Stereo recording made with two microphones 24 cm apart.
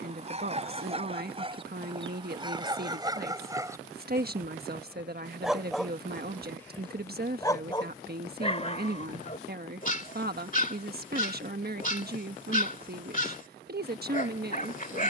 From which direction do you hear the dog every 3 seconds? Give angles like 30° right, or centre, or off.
20° right, 10° right, 20° left, 30° left, 30° left.